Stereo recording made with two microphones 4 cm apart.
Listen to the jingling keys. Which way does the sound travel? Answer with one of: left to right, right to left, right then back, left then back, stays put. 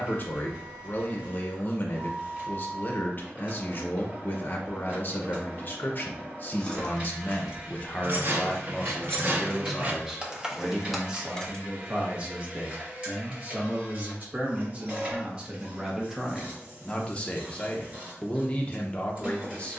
right then back.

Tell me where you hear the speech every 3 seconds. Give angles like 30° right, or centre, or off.
40° left, 40° left, 30° left, 10° right, 30° right, centre, 20° left.